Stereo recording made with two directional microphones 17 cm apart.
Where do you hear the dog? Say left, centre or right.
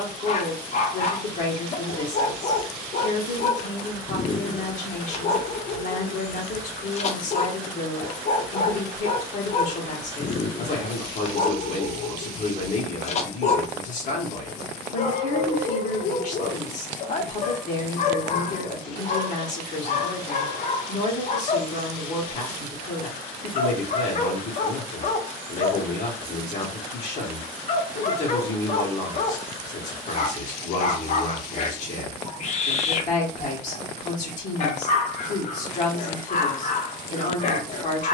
left.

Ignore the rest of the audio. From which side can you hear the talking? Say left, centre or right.
left.